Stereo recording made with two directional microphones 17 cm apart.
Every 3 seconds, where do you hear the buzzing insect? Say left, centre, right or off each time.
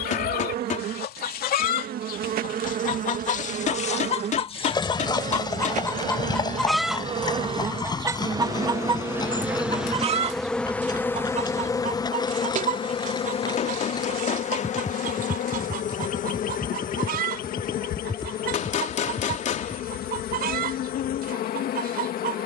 right, right, right, centre, left, left, left, left.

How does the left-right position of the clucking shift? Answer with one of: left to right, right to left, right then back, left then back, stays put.
left to right.